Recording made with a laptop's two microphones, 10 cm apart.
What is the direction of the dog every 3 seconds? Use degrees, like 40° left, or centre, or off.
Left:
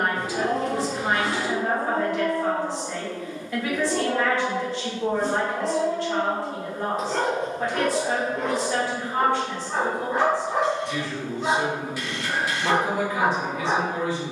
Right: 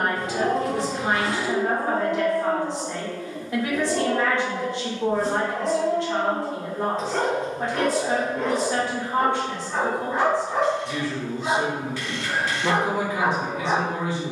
20° right, 10° left, 20° left, 20° left, 20° left.